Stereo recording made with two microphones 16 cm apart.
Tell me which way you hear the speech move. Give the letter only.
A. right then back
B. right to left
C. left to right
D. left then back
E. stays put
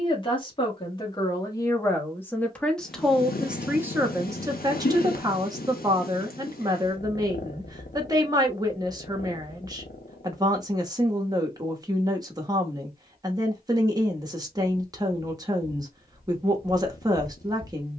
C.